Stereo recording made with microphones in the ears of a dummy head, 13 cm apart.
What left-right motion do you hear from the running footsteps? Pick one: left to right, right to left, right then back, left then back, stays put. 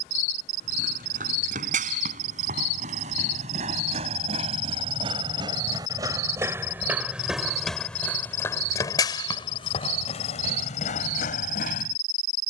right to left.